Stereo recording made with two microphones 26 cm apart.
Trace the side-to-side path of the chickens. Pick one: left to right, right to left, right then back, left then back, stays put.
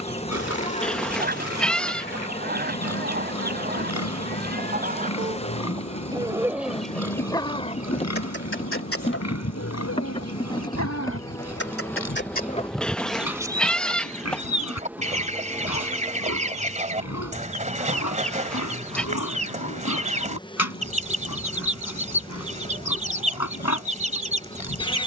left then back.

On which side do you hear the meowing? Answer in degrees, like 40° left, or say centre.
centre.